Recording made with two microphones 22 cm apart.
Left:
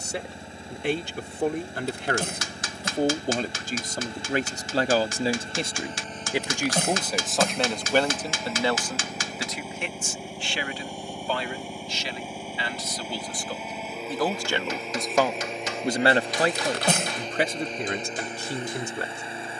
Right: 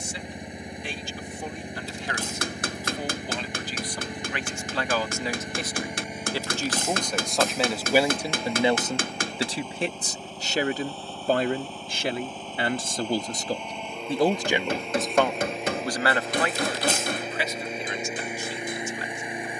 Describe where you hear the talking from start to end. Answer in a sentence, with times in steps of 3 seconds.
You can hear the talking on the left from 0 s, in the centre from 6 s, on the right from 9 s and on the left from 15 s.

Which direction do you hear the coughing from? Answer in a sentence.
In this clip you hear the coughing on the left.